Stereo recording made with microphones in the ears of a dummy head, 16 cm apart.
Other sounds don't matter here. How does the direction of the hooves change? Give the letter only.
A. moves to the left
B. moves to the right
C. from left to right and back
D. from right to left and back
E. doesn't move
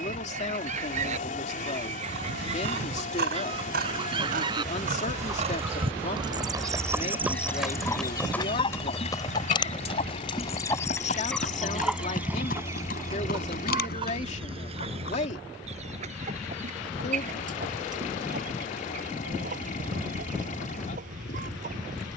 A.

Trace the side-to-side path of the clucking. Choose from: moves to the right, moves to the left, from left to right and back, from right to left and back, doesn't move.
from right to left and back.